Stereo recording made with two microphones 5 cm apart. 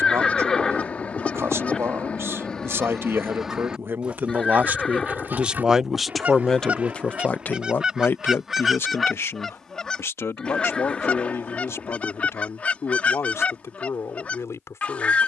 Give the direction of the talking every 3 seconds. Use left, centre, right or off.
right, right, left, left, left.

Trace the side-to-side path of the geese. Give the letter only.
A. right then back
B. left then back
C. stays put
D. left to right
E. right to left
A.